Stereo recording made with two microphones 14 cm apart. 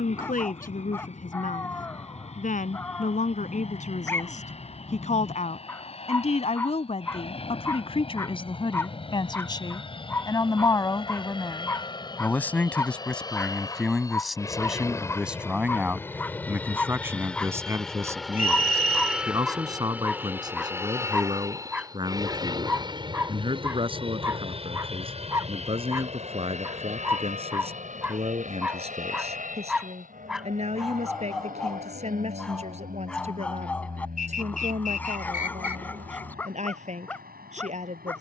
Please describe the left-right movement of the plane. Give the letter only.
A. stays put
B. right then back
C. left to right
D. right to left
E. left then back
C.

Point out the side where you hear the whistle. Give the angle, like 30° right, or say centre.
70° left.